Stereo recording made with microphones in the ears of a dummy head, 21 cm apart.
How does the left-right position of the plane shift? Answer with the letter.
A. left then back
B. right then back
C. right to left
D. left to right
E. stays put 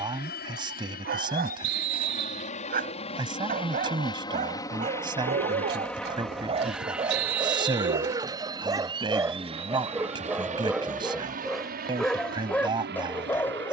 D.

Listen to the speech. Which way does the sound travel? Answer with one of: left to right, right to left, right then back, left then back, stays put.
stays put.